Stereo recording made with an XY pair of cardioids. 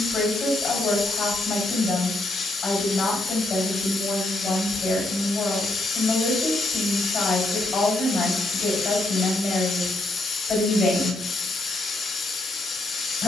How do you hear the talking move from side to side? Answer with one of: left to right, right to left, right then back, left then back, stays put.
stays put.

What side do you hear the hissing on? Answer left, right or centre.
left.